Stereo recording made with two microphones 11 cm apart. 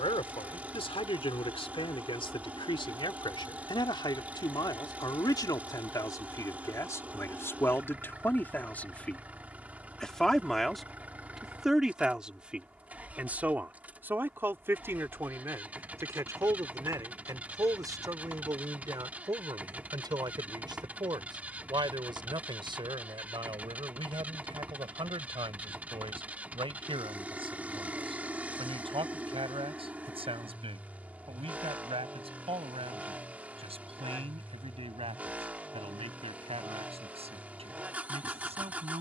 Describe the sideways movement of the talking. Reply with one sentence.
In this clip you hear the talking travel towards the right.